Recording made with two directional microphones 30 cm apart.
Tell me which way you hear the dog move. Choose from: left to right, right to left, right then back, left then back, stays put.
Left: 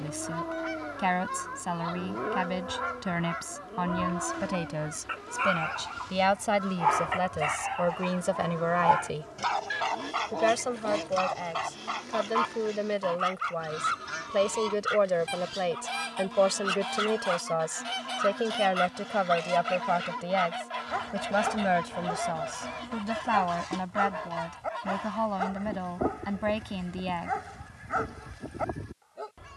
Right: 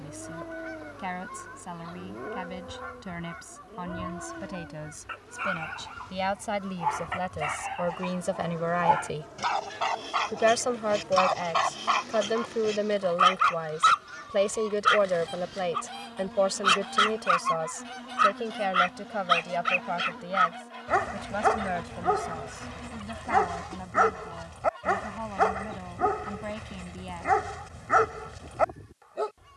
left to right.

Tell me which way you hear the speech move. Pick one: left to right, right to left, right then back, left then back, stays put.
right then back.